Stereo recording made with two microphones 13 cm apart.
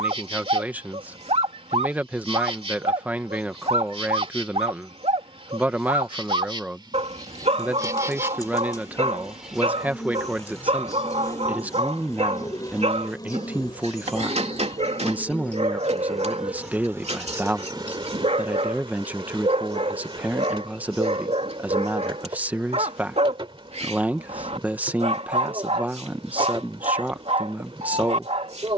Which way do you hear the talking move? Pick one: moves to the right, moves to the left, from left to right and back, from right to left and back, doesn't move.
doesn't move.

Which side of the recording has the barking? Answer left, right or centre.
right.